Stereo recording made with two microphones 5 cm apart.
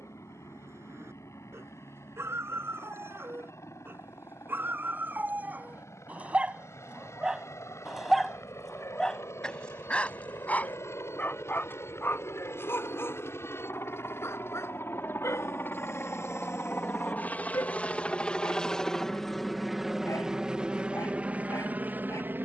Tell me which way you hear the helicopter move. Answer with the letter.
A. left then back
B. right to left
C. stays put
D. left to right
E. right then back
D.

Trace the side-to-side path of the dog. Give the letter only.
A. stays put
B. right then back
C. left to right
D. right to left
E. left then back
D.